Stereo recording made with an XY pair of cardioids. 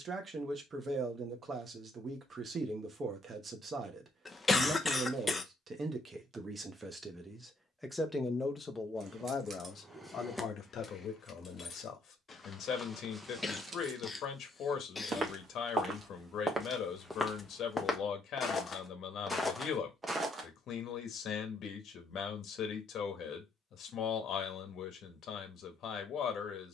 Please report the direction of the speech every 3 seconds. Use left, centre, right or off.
right, right, centre, left, left, left, left, left, left.